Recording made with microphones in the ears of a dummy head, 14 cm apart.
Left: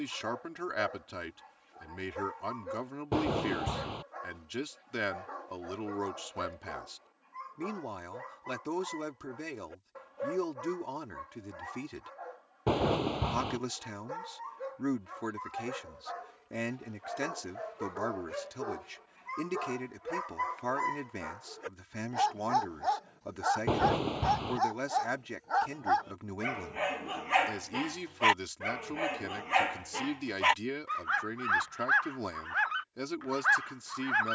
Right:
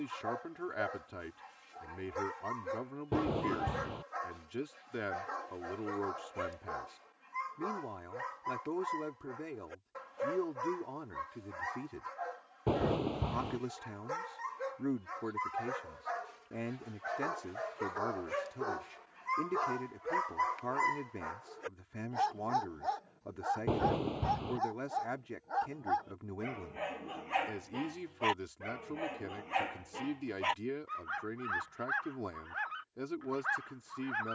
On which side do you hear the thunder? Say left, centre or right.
left.